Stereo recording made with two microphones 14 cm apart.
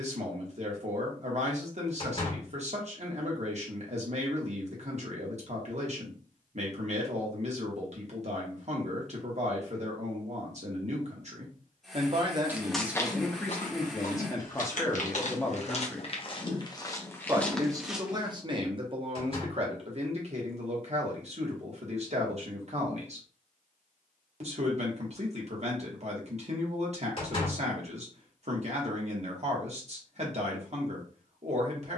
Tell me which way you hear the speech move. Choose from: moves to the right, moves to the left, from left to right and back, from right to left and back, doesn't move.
from right to left and back.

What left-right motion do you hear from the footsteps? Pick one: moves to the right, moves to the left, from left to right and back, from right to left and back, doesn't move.
from right to left and back.